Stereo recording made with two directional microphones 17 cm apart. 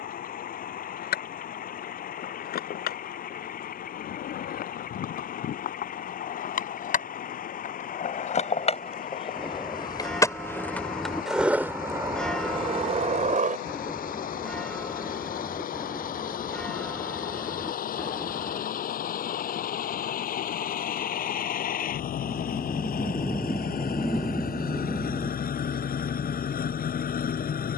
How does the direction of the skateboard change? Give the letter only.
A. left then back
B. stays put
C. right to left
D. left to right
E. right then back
D.